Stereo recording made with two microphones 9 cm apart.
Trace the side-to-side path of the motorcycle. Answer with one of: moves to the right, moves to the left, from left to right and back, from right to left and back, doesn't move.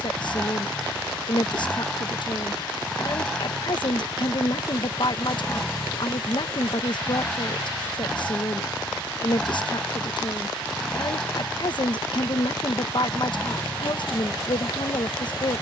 doesn't move.